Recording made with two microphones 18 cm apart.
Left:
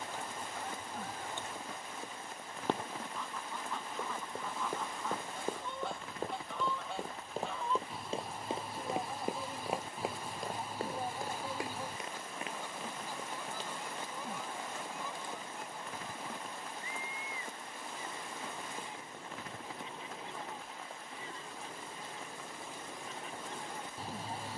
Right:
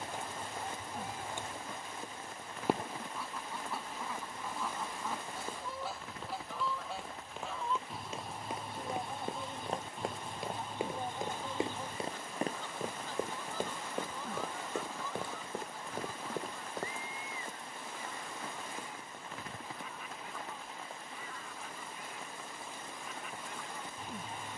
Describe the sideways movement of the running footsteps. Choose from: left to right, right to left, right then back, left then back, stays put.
left to right.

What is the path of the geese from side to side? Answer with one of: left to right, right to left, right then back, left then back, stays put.
right to left.